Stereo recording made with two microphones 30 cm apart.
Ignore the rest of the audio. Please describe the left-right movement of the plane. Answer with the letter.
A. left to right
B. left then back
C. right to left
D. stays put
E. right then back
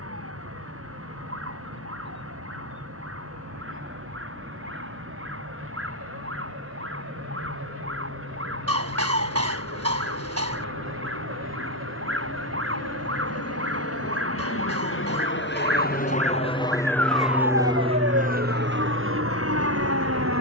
A.